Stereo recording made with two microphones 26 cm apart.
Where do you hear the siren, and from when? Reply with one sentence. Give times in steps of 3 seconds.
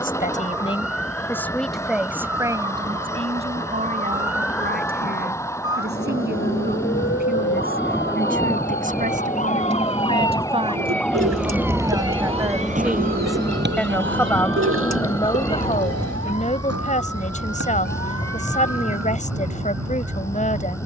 You can hear the siren on the left from 0 s, in the centre from 9 s and on the right from 12 s.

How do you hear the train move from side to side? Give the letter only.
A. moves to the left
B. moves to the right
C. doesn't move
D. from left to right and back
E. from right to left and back
C.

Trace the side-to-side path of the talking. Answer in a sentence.
You can hear the talking move from left to right and back again.